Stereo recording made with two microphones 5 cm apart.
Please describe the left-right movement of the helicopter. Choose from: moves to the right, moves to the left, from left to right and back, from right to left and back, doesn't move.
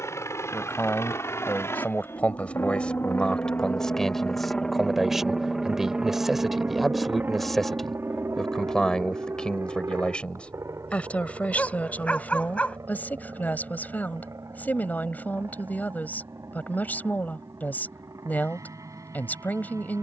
moves to the right.